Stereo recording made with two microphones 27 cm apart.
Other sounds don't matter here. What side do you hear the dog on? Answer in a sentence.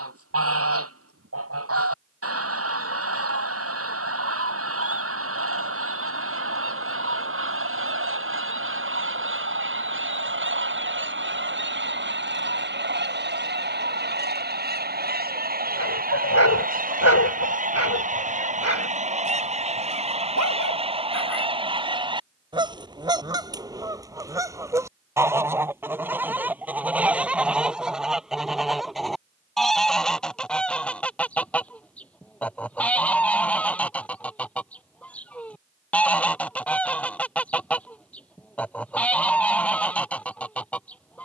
In this clip you hear the dog on the left.